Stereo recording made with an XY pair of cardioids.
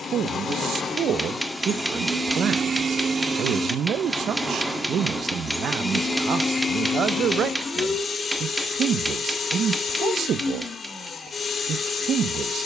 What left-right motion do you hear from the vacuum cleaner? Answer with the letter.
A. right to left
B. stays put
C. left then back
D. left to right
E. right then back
E.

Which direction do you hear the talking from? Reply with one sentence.
In this clip you hear the talking on the right.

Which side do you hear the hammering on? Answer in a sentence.
In this clip you hear the hammering in the centre.